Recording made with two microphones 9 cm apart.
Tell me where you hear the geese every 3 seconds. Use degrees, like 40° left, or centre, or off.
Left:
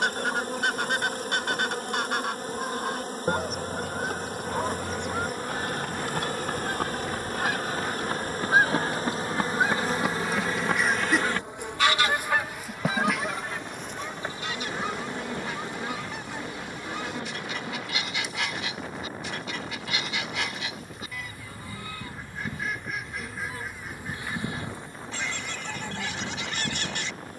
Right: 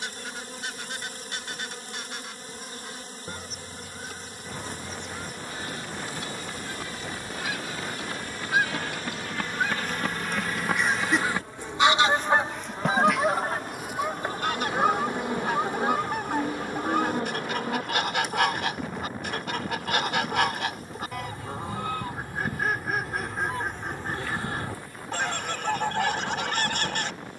70° left, 60° left, 50° left, 10° left, 40° right, 50° right, 50° right, 50° right, 50° right.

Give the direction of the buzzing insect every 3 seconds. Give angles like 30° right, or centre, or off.
50° left, 50° left, 50° left, 30° left, centre, 30° right, 40° right, 10° right, 30° left.